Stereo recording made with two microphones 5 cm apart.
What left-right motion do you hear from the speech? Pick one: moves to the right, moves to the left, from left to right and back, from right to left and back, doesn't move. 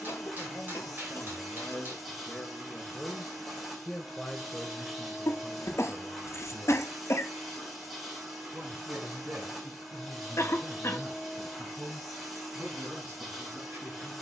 moves to the right.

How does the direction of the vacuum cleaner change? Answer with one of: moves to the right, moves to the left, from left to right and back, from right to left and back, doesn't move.
doesn't move.